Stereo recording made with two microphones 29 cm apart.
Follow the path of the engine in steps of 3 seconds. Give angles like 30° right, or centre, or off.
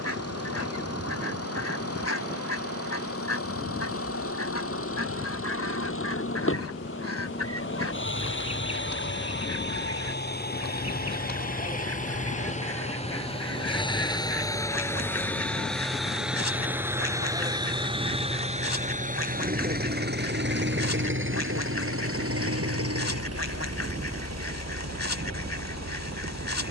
50° left, 50° left, 40° left, 30° left, 20° left, centre, 30° right, 50° right, 60° right.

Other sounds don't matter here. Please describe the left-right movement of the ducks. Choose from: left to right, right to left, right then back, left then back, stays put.
stays put.